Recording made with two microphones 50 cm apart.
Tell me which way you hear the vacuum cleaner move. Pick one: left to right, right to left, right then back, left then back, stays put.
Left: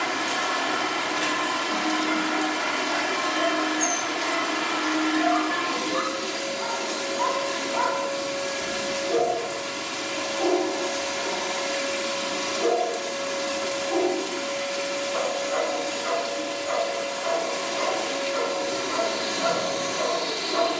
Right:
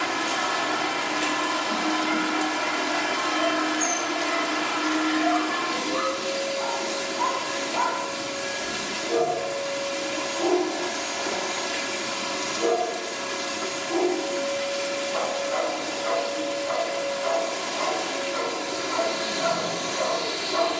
stays put.